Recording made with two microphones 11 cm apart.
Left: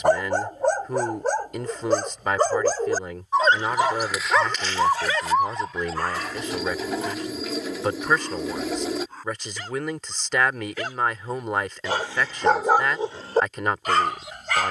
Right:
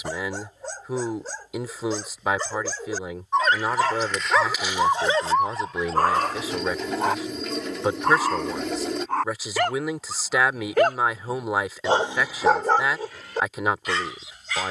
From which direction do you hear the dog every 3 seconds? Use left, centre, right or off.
left, centre, right, right, left.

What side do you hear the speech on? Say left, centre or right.
centre.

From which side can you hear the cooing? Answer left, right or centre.
centre.